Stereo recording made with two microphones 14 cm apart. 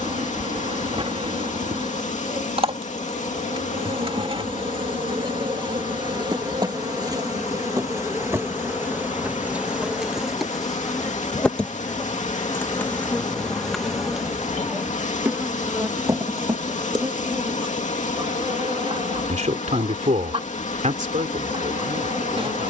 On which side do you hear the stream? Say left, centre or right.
left.